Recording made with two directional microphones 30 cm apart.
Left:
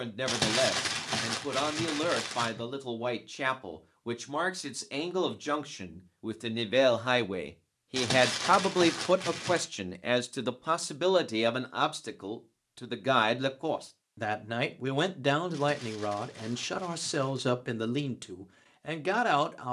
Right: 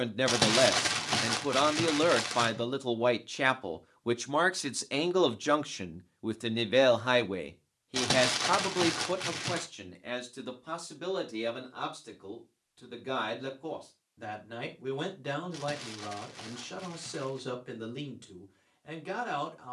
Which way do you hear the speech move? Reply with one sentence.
In this clip you hear the speech move from right to left.